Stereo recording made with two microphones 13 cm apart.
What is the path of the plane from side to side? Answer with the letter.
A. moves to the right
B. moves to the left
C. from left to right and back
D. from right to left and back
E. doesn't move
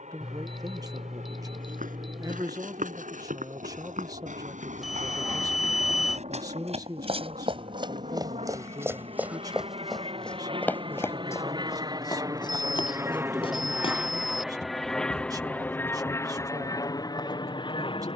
B.